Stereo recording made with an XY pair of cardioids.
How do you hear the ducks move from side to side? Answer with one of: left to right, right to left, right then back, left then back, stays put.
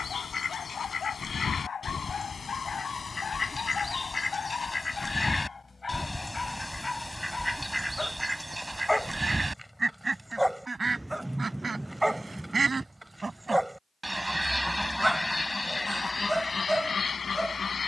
right then back.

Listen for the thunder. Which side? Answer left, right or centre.
centre.